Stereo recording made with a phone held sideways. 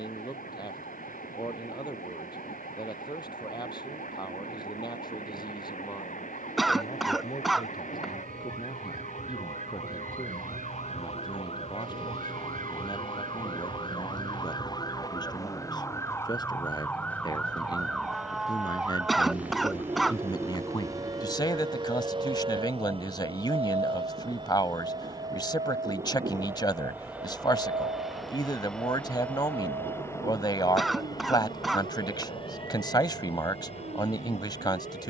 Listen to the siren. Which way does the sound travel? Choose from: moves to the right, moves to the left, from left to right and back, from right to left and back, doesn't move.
moves to the right.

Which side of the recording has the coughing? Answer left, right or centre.
centre.